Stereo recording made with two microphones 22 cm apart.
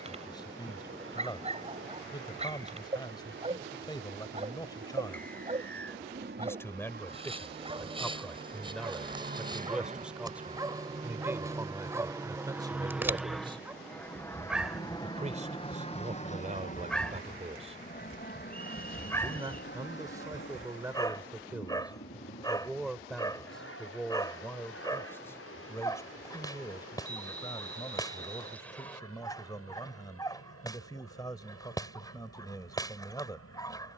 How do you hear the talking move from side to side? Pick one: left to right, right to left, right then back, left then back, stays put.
right then back.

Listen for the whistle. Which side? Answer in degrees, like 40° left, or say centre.
10° left.